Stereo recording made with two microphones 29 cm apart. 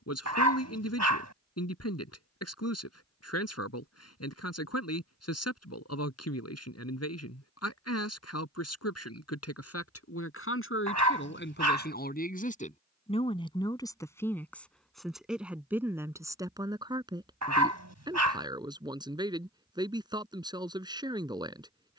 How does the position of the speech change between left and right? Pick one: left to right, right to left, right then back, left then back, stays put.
left to right.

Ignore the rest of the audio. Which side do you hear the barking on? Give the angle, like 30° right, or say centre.
70° right.